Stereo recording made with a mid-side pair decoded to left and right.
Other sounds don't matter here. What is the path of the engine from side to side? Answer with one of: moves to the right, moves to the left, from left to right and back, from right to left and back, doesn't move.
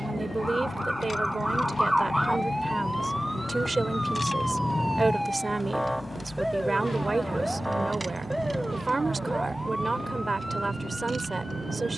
moves to the right.